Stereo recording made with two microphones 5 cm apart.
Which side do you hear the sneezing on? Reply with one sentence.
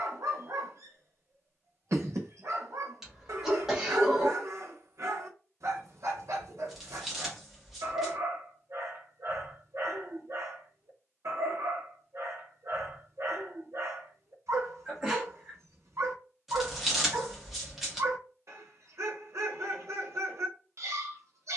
You can hear the sneezing in the centre.